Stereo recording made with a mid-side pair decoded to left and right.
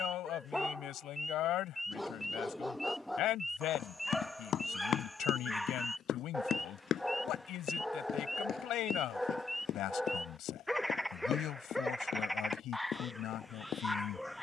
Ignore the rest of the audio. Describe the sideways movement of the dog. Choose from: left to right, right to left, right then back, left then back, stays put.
stays put.